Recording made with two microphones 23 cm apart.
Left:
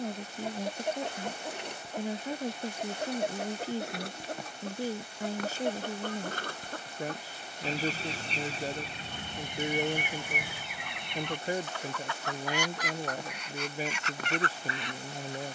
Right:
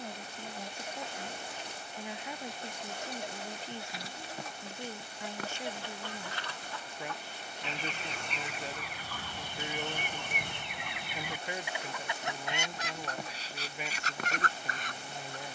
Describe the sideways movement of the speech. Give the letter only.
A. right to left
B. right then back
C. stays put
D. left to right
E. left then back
C.